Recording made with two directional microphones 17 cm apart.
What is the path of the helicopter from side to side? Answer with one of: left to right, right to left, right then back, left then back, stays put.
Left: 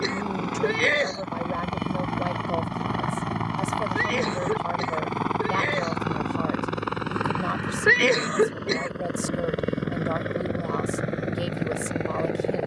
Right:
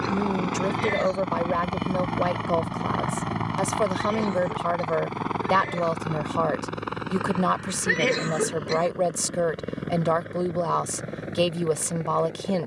right to left.